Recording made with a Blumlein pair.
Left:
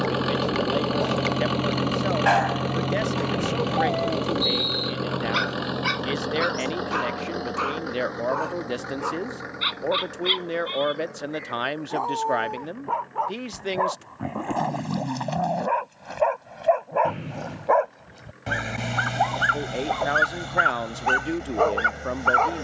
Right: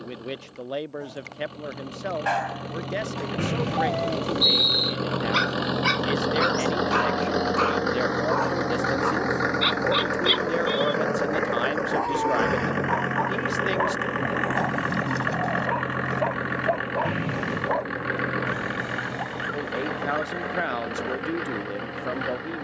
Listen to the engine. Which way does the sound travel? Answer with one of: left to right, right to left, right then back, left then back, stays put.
left to right.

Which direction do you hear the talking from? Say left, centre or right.
centre.